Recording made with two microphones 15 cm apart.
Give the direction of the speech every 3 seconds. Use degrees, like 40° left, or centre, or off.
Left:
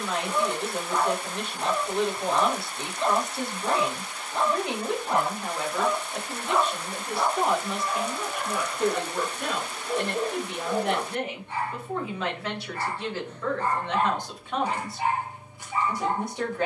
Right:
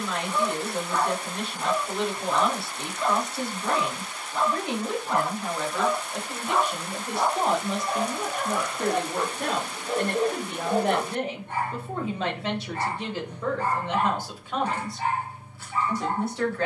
20° left, 20° left, 30° right, 40° right, 10° right, 10° left.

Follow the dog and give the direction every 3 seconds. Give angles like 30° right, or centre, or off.
20° left, 20° left, 30° right, 60° right, 10° right, 20° left.